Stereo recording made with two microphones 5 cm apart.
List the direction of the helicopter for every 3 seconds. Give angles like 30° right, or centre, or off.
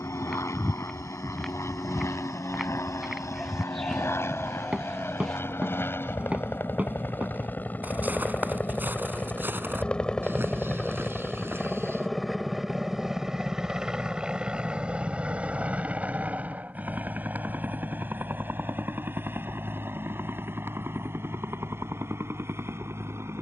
60° left, 50° left, 40° left, 10° left, 10° right, 30° right, 40° right, 50° right.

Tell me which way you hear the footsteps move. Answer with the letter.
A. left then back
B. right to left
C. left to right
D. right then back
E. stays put
C.